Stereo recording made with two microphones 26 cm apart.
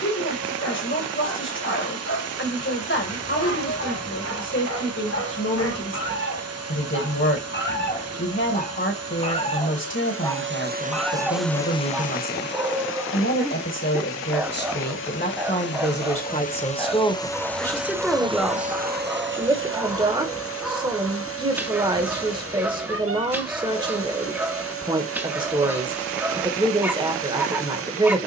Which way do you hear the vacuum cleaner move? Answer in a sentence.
In this clip you hear the vacuum cleaner go left and come back.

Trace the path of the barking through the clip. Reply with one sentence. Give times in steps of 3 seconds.
You can hear the barking on the left from 0 s and in the centre from 9 s.